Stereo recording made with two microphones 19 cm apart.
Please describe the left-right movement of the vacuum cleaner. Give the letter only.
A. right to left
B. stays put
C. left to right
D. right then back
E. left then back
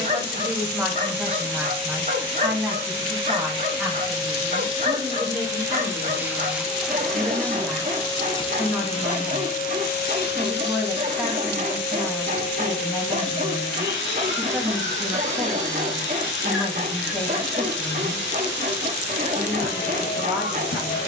A.